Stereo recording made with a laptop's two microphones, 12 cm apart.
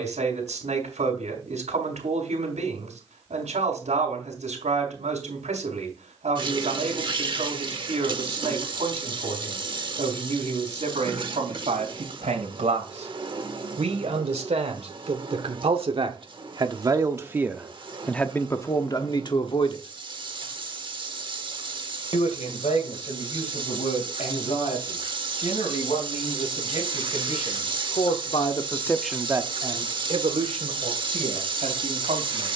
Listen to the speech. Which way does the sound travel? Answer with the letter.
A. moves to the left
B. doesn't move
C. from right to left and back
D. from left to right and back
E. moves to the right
C.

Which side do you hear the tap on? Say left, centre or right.
right.